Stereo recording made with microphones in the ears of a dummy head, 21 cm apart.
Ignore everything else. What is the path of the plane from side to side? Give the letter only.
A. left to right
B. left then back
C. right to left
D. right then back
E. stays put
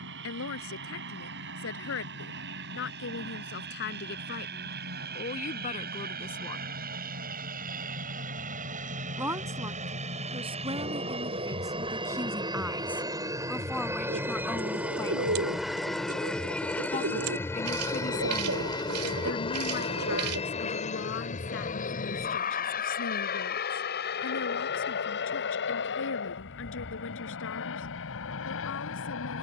C.